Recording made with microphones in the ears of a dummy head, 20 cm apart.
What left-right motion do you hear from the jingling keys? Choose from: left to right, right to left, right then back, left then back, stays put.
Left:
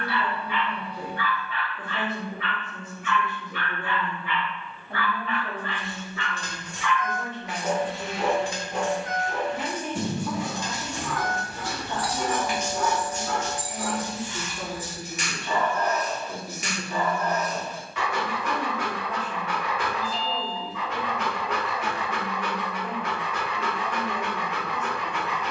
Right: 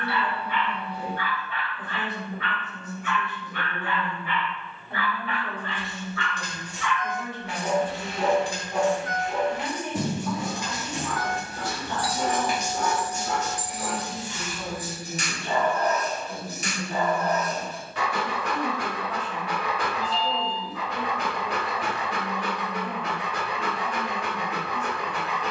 left then back.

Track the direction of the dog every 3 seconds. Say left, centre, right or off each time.
right, right, centre, right, right, right, right, right, right.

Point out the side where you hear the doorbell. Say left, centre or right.
right.